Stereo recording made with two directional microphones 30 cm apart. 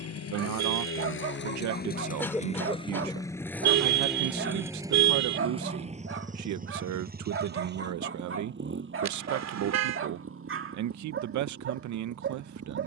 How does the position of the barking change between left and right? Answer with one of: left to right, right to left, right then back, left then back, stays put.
stays put.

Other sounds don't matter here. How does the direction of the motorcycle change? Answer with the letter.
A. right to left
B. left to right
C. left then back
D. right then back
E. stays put
B.